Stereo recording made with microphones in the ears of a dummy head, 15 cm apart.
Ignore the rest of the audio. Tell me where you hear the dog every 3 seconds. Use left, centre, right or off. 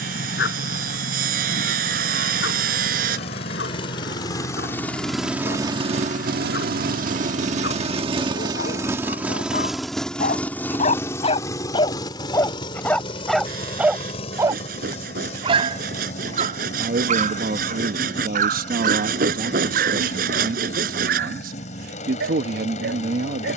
left, left, left, left, centre, right, right, right.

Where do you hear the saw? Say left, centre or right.
right.